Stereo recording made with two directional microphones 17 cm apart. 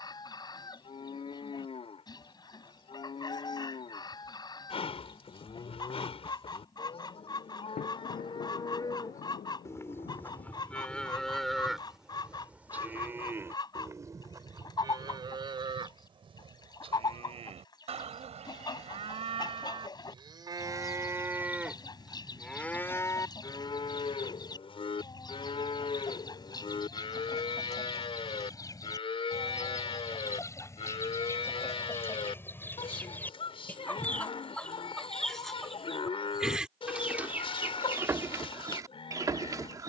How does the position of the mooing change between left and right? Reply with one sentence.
In this clip you hear the mooing go right and come back.